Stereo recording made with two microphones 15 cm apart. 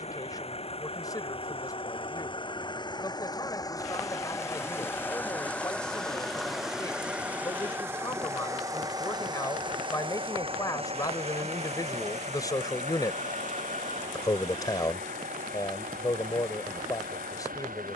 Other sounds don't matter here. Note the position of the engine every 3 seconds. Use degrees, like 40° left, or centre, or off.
40° left, 20° left, 10° right, 40° right, 60° right, 70° right.